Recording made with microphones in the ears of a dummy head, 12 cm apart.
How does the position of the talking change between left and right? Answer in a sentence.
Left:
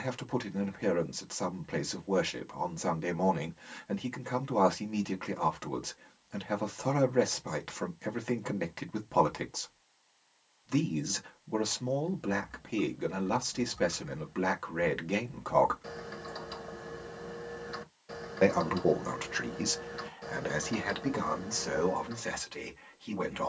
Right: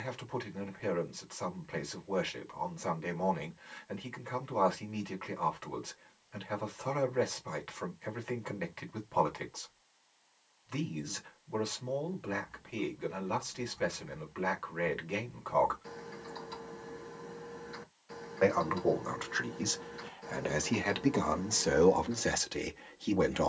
In this clip you hear the talking go from the left side to the right.